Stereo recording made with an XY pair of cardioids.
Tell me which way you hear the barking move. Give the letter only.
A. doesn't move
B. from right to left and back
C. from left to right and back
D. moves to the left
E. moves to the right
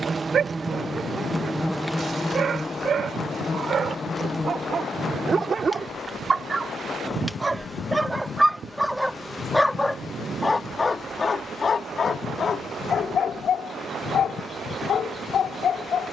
D.